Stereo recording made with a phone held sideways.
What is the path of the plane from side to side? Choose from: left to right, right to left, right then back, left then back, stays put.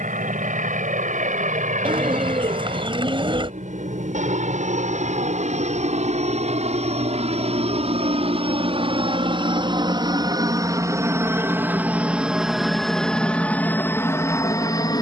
right to left.